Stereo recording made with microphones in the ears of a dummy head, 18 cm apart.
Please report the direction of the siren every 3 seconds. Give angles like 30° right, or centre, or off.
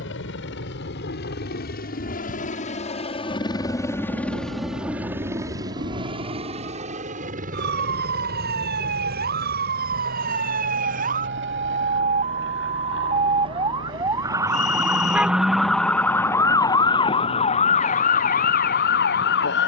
60° right, 60° right, 50° right, 40° right, 20° right, 20° left, 50° left.